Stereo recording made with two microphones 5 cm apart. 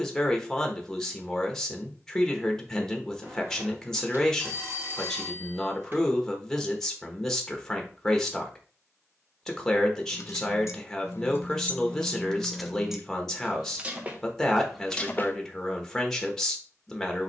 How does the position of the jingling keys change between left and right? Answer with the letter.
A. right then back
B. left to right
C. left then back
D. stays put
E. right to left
A.